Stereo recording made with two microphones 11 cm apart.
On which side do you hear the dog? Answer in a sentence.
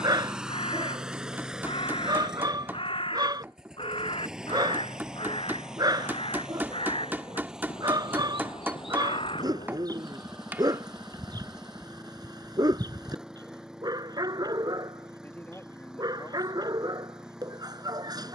In this clip you hear the dog on the right.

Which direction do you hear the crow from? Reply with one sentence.
You can hear the crow on the left.